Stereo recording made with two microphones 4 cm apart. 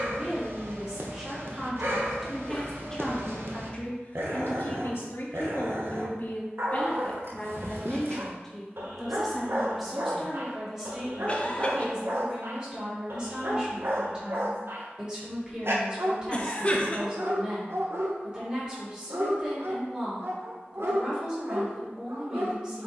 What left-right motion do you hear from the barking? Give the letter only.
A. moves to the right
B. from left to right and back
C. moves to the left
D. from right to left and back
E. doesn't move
E.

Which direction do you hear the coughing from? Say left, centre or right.
left.